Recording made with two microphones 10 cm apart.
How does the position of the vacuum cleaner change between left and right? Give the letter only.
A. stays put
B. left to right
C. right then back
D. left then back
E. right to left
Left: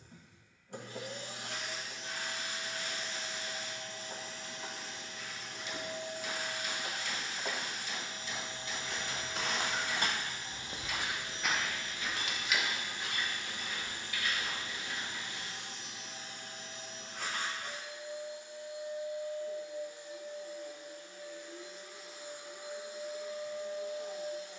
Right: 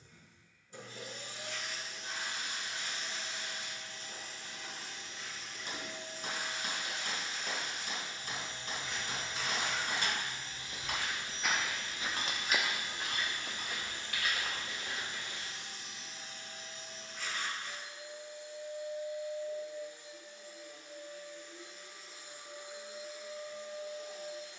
A.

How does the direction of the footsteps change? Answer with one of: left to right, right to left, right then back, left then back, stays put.
left to right.